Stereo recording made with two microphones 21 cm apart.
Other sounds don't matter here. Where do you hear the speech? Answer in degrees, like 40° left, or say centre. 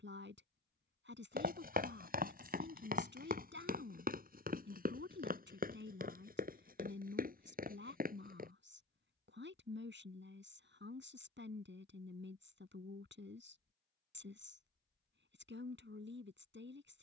60° right.